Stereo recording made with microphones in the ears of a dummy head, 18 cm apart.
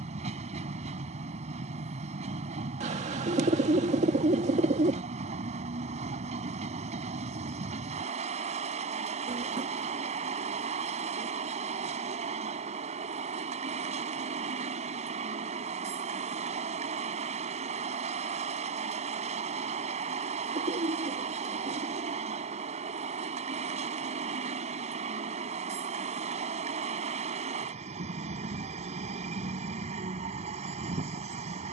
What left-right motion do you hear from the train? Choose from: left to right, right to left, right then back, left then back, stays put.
stays put.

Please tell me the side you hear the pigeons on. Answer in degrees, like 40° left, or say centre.
30° right.